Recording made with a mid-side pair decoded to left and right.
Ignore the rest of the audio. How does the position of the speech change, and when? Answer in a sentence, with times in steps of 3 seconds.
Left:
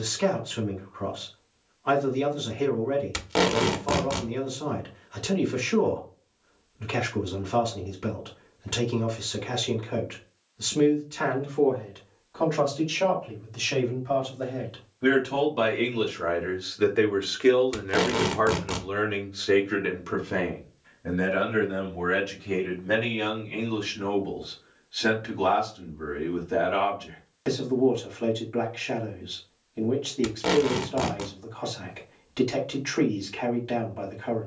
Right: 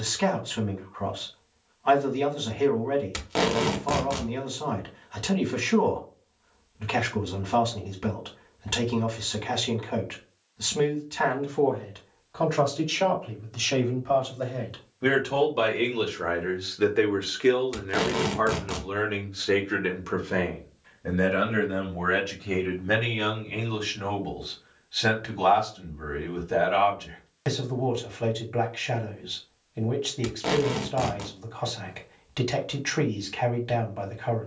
You can hear the speech on the right from 0 s, in the centre from 15 s and on the right from 21 s.